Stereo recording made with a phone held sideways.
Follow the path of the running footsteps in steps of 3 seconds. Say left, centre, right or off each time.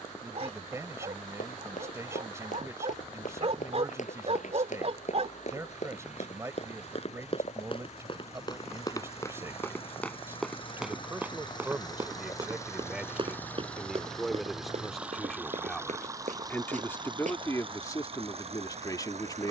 left, left, left, centre, right, right, off.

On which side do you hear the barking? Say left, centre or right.
right.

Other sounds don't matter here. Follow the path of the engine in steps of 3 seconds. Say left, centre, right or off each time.
left, left, left, left, centre, right, right.